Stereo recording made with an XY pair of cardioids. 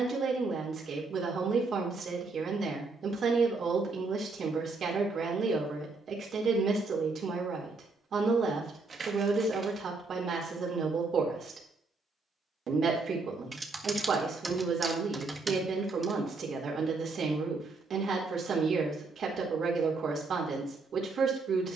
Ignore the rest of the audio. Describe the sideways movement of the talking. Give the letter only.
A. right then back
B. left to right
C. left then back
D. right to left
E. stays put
E.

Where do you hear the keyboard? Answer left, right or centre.
right.